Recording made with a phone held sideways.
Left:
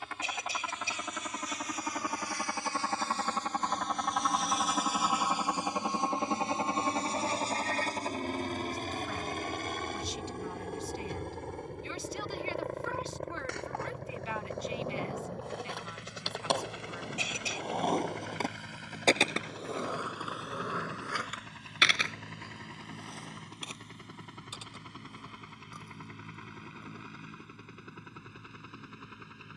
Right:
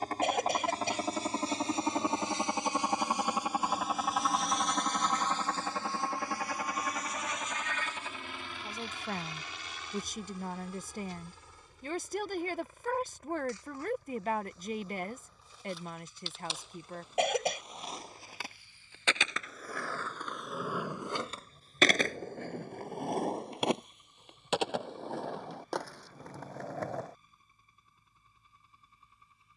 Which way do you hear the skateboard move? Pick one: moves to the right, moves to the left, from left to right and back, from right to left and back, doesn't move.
moves to the right.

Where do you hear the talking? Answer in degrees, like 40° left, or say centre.
50° right.